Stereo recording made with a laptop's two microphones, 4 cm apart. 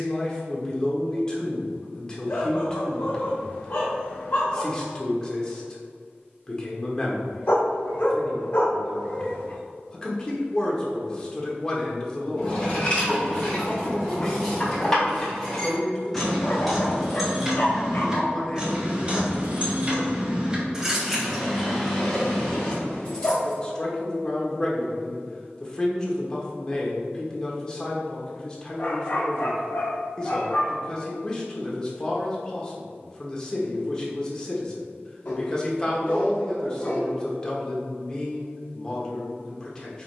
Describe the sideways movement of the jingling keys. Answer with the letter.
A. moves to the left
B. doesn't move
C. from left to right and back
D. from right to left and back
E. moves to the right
C.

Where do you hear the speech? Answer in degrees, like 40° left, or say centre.
20° left.